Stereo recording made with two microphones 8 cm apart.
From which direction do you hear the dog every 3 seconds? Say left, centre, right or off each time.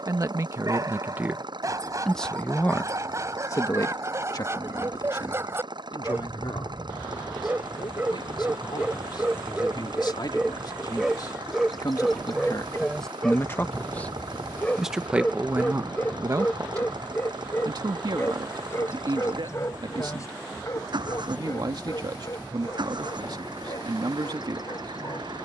right, right, right, centre, centre, left, left, left, left.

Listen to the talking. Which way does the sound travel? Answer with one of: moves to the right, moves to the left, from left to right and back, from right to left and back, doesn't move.
from right to left and back.